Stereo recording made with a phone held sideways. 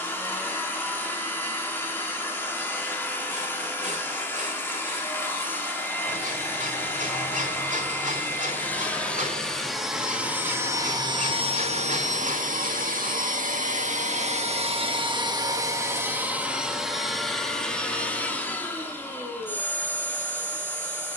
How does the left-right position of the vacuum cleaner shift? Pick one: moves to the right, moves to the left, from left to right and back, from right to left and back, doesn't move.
from left to right and back.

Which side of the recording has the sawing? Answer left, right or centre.
right.